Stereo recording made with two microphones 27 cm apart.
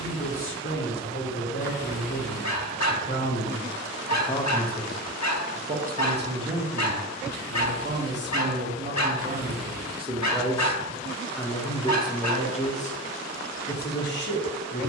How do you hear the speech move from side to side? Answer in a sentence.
You can hear the speech go right and come back.